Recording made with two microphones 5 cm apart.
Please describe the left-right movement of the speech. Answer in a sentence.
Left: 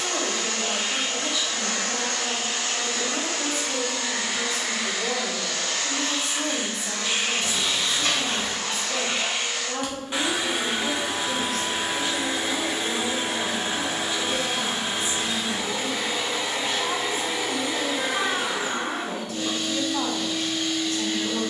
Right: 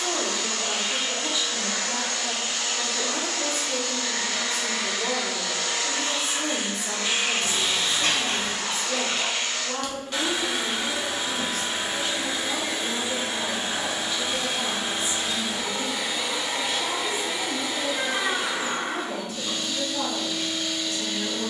In this clip you hear the speech travel towards the left.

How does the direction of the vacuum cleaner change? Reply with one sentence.
In this clip you hear the vacuum cleaner go right and come back.